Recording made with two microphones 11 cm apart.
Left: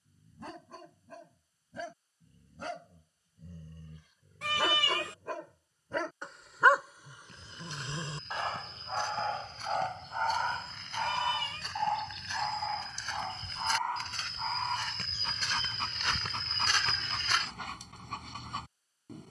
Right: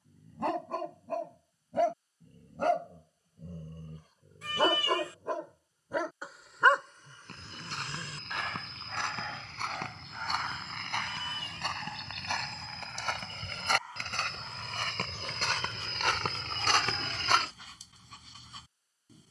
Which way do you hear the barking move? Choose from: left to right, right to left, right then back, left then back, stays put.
right to left.